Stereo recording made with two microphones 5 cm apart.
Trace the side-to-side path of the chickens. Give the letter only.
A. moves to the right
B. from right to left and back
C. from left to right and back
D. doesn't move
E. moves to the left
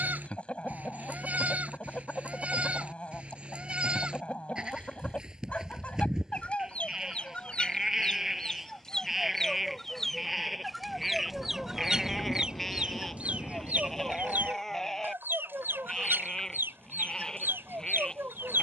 A.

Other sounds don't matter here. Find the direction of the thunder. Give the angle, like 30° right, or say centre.
50° left.